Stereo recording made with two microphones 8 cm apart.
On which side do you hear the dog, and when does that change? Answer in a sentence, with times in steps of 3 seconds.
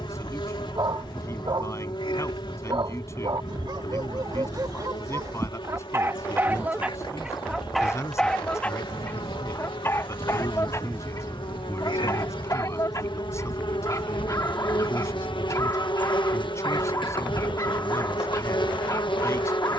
You can hear the dog on the right from 0 s, in the centre from 6 s and on the left from 9 s.